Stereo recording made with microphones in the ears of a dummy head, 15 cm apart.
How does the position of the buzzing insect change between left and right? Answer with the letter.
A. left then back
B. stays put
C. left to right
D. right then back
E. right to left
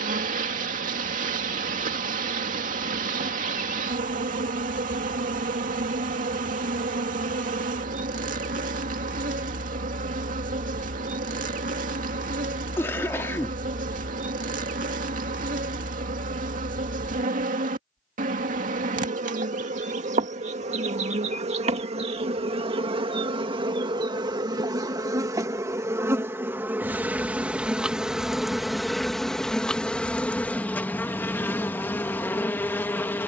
E.